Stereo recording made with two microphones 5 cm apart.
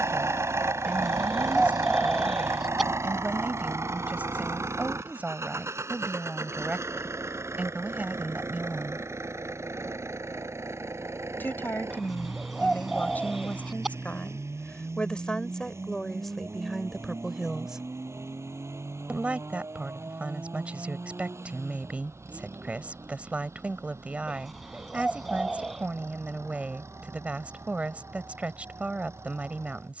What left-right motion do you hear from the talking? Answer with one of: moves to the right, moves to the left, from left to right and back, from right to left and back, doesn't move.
from right to left and back.